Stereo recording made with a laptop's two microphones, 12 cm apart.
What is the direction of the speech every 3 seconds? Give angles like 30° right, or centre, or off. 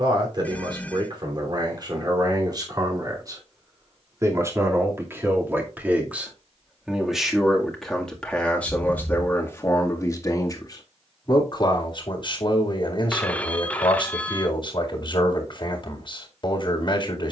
40° right, 20° right, centre, 30° left, 40° left, 40° left.